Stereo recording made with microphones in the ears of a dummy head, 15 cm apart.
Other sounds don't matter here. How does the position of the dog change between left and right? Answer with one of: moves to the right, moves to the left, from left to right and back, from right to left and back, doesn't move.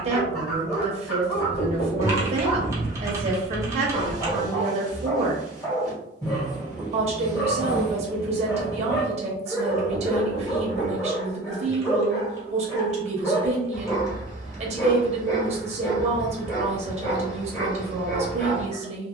doesn't move.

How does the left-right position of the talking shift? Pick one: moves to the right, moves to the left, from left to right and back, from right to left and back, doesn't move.
doesn't move.